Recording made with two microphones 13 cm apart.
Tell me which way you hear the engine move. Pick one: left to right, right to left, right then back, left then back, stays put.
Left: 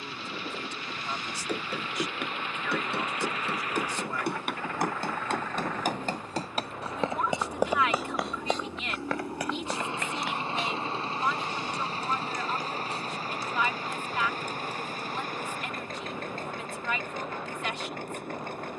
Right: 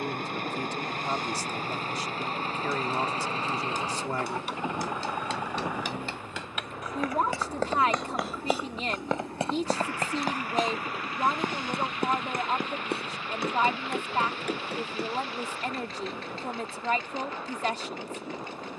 right to left.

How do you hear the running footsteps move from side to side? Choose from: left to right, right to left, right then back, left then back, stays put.
left to right.